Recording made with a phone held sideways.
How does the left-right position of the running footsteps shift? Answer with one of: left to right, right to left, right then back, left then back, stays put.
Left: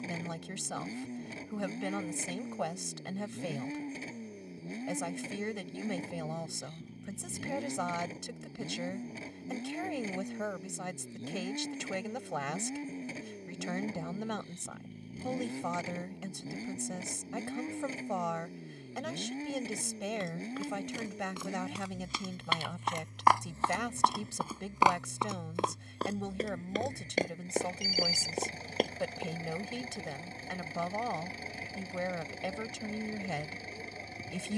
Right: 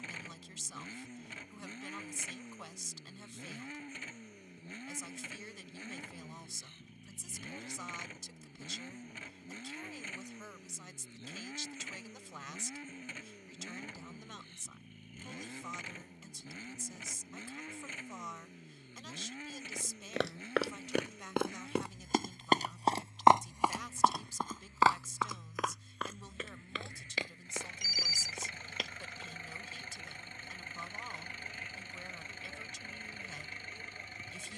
right to left.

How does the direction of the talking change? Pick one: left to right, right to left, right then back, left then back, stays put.
stays put.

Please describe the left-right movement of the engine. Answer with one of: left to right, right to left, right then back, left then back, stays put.
stays put.